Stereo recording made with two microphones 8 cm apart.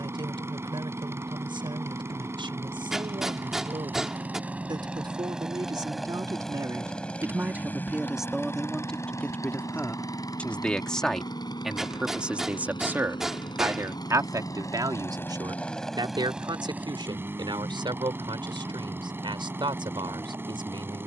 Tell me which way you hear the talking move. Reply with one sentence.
You can hear the talking move from right to left and back again.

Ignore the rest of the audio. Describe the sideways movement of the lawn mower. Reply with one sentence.
You can hear the lawn mower go left and come back.